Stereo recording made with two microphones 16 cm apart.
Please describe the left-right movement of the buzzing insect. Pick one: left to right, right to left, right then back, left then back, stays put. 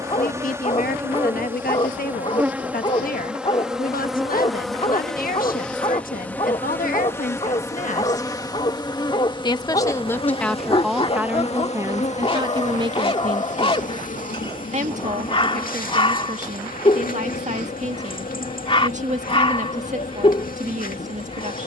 right to left.